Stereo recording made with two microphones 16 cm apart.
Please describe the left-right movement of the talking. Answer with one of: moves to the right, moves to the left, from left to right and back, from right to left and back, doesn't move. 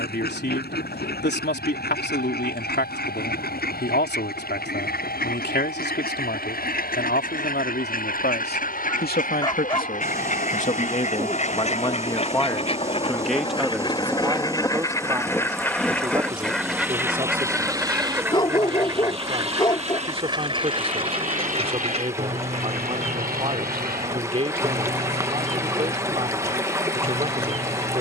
moves to the right.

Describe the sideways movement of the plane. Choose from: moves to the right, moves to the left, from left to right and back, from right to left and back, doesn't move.
moves to the right.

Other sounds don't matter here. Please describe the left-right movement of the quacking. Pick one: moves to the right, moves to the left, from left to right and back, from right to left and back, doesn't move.
moves to the right.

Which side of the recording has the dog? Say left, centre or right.
left.